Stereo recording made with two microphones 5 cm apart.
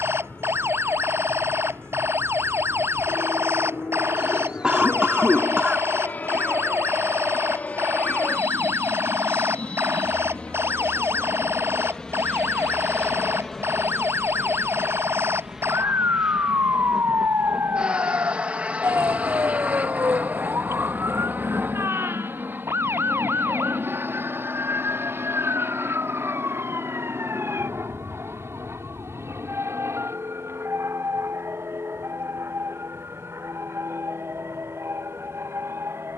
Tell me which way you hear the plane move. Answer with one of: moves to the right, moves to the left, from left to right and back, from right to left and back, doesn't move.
moves to the right.